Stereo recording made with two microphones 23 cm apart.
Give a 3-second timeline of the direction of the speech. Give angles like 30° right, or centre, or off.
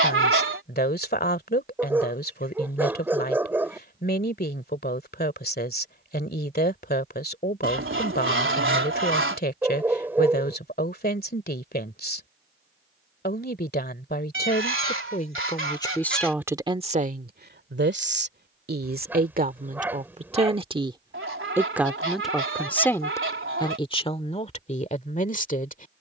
40° left, 40° left, 40° left, 40° left, 40° left, 10° right, 30° right, 10° left, 30° left.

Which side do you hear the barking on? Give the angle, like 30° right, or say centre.
10° right.